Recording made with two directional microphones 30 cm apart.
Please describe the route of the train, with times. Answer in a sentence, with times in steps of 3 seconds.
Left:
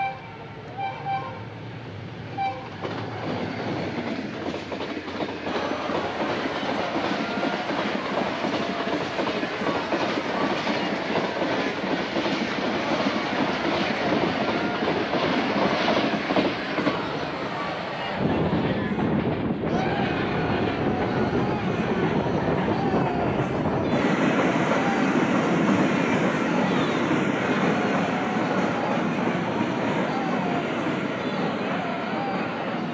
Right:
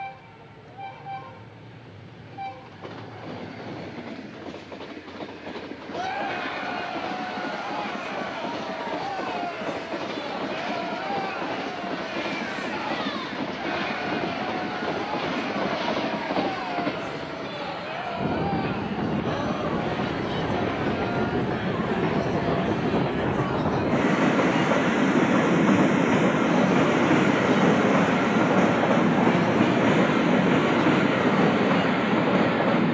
In this clip you hear the train on the left from 0 s, in the centre from 21 s and on the right from 27 s.